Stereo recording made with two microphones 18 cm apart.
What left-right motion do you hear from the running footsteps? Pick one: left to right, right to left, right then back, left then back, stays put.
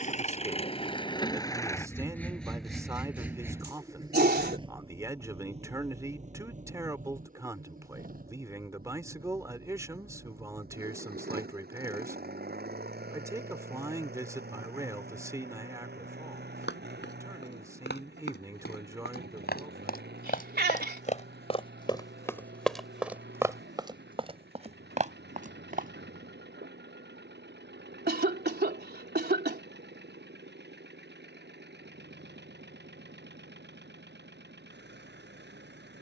left to right.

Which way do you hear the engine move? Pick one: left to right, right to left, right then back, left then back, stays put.
left to right.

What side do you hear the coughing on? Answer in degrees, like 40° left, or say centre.
70° right.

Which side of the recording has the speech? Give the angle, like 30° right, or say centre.
20° right.